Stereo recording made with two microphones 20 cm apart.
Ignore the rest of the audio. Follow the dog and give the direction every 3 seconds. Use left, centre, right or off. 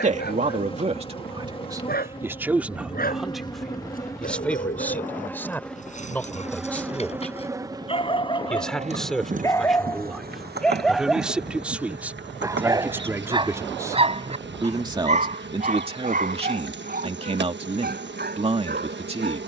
left, left, left, centre, right, right, right.